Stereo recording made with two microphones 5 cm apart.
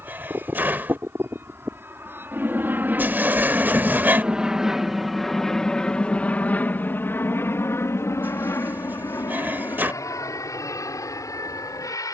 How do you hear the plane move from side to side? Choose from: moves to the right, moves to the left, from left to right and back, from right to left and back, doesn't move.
moves to the left.